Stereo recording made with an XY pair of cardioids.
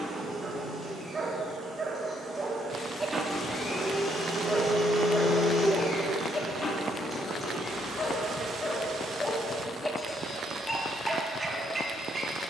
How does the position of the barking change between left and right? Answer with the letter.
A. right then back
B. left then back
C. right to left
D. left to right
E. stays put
B.